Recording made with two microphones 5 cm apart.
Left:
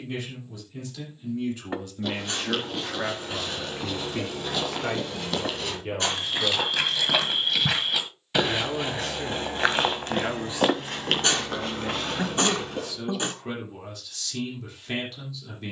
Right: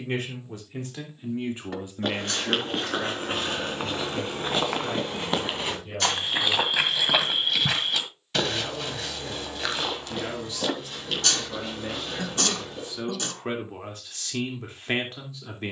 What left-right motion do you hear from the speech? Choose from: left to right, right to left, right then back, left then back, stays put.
left then back.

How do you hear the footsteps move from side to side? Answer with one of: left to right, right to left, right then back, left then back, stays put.
right to left.